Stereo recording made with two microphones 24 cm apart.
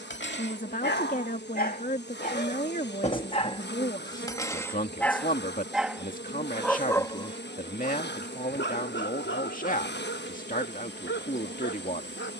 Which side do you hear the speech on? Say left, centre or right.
left.